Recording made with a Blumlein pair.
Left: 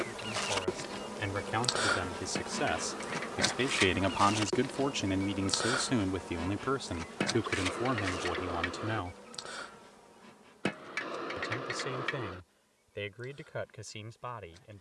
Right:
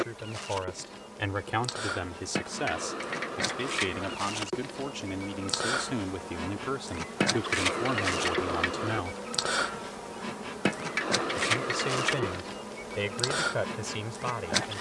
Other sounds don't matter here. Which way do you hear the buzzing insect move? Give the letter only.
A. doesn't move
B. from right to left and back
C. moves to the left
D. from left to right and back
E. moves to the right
E.